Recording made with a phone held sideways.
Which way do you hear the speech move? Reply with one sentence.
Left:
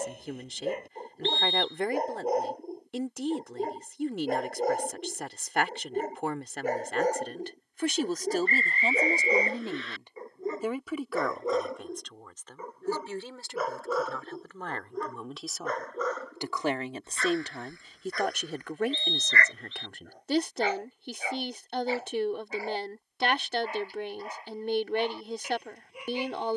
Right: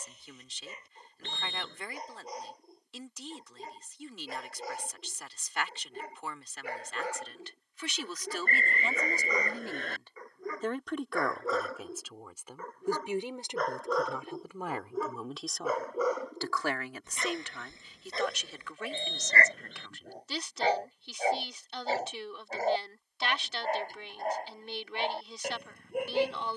In this clip you hear the speech go right and come back.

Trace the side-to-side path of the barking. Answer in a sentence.
In this clip you hear the barking travel towards the right.